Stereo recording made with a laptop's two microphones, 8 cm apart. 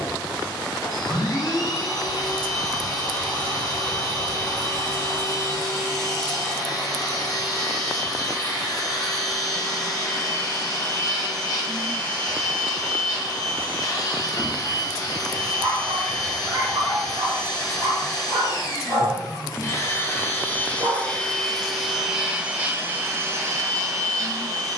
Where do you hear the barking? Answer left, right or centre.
right.